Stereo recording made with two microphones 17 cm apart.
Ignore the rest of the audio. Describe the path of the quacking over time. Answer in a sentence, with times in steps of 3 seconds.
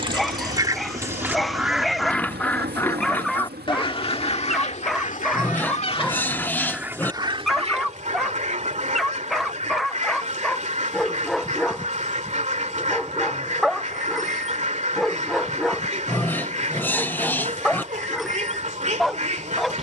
You can hear the quacking in the centre from 0 s, on the left from 3 s and on the right from 6 s.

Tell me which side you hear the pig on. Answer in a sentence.
In this clip you hear the pig in the centre.